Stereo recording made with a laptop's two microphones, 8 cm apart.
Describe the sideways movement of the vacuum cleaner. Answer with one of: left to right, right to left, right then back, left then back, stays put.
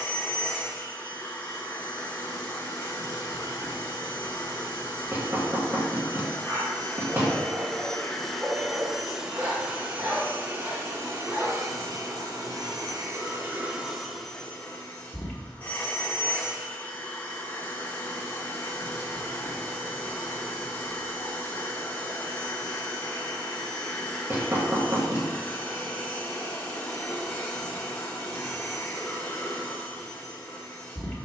right then back.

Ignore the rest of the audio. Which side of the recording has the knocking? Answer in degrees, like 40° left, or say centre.
30° right.